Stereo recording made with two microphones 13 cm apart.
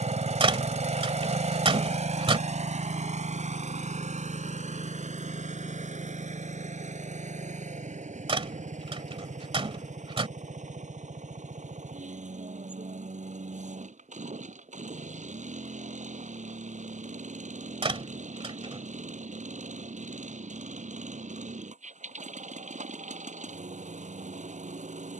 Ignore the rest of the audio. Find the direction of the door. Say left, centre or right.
right.